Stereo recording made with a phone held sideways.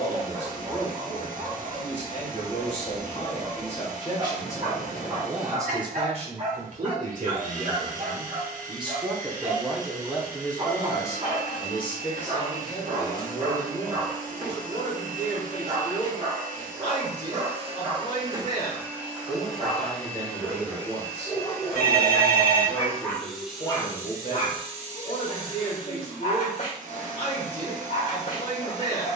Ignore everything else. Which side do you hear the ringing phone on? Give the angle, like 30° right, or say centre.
60° left.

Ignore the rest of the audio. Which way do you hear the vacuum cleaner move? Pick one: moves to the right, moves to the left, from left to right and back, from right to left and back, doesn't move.
from right to left and back.